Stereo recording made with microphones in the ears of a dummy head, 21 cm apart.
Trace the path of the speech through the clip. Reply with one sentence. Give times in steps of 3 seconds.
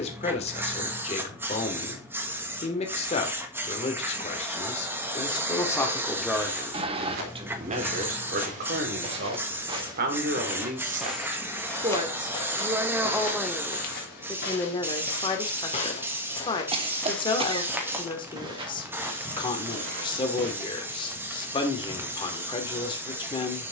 You can hear the speech on the left from 0 s, on the right from 6 s, in the centre from 12 s and on the left from 15 s.